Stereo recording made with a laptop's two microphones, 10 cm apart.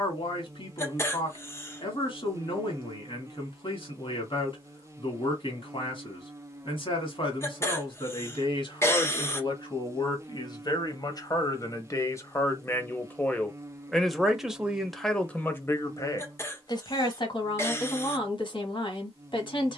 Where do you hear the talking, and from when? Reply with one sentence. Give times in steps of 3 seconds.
You can hear the talking on the left from 0 s, in the centre from 12 s and on the left from 15 s.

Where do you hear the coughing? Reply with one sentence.
In this clip you hear the coughing on the left.